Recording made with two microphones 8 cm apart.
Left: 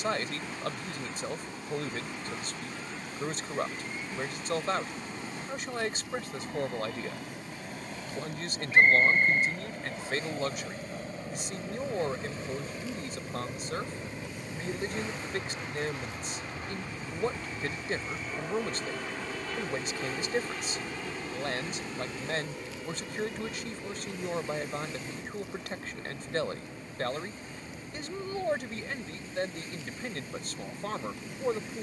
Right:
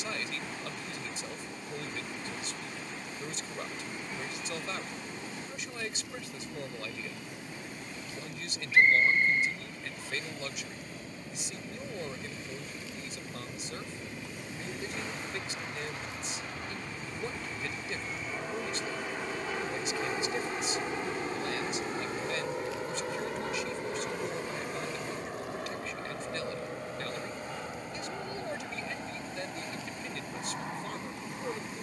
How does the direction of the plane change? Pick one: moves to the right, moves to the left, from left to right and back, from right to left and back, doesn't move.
moves to the right.